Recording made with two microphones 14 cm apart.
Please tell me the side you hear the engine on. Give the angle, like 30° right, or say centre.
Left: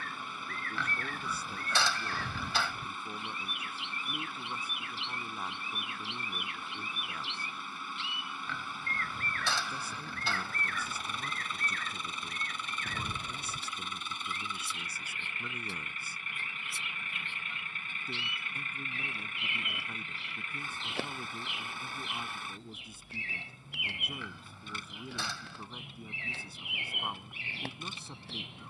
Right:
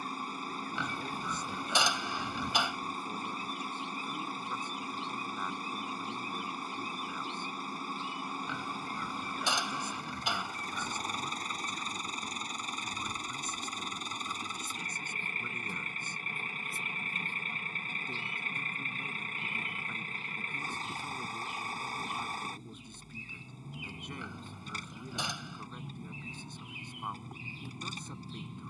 40° right.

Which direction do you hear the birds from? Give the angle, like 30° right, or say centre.
80° left.